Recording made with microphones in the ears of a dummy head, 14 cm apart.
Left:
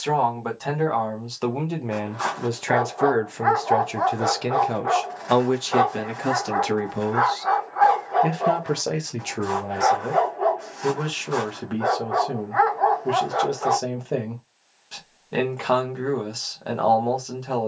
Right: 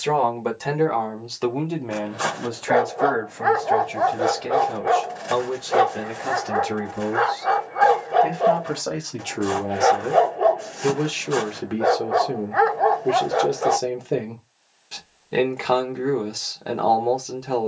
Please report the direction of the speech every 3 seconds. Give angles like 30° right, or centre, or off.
centre, 50° left, 60° left, centre, 10° right, 10° right.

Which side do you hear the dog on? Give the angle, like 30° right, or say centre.
30° right.